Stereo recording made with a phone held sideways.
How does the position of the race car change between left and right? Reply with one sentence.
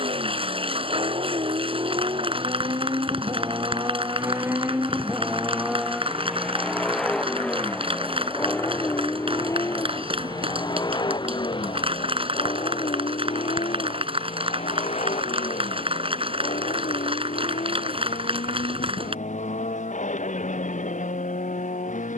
In this clip you hear the race car move from right to left.